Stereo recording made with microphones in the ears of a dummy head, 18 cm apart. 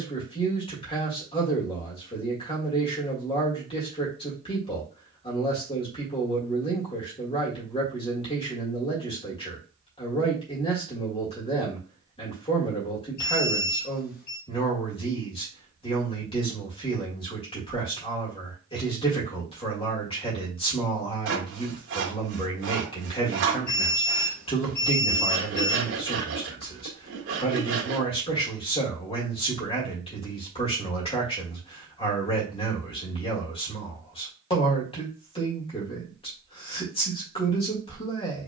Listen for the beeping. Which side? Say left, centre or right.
left.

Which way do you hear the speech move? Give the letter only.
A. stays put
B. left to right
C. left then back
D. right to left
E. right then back
A.